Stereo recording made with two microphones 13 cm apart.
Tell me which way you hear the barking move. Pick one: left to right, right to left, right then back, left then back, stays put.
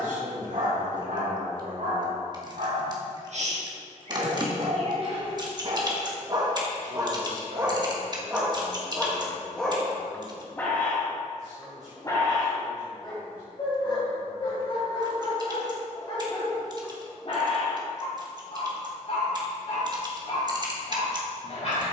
right to left.